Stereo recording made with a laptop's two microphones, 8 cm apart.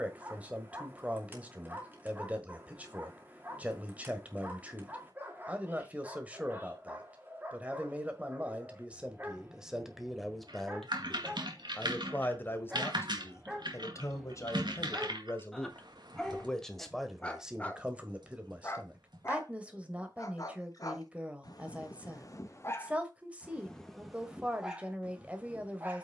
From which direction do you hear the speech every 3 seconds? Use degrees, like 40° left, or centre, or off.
20° right, 20° right, 20° right, centre, 30° left, 10° left, 20° right, 20° right, 20° right.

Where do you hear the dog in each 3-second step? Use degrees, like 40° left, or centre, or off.
20° right, 20° right, 20° right, 20° right, 10° right, 10° left, 40° left, 40° left, 10° right.